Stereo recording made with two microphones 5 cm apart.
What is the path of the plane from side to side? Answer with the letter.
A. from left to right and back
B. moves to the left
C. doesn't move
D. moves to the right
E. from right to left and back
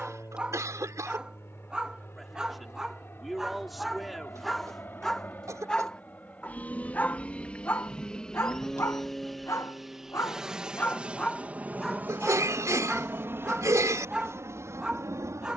D.